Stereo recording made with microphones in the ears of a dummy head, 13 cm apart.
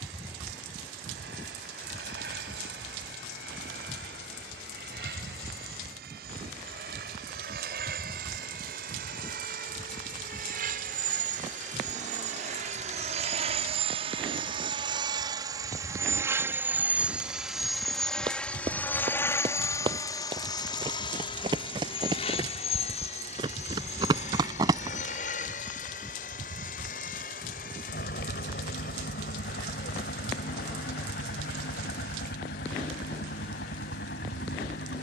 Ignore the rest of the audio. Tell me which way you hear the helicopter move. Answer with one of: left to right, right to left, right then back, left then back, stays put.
right to left.